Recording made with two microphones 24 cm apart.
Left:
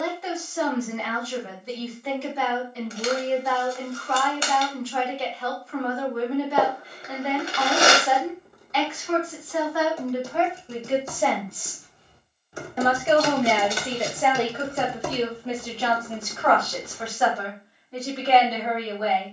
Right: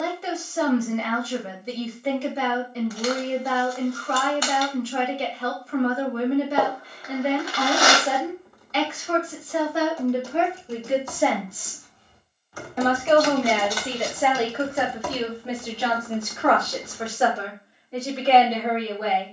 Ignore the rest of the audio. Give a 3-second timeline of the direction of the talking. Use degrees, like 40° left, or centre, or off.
30° right, 30° right, 30° right, 20° right, centre, 20° right, 30° right.